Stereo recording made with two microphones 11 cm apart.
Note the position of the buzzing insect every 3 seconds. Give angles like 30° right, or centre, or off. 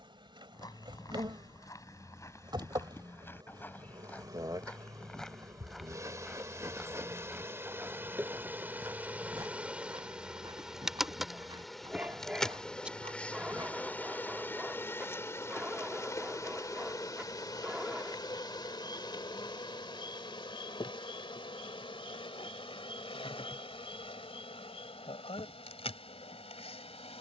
40° right, 40° right, 20° right, 10° right, 10° left, 30° left, 40° left, 50° left, 60° left.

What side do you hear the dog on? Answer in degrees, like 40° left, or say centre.
10° right.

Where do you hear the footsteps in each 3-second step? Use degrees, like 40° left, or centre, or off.
30° left, 10° left, 10° right, 40° right, 50° right, off, off, off, off.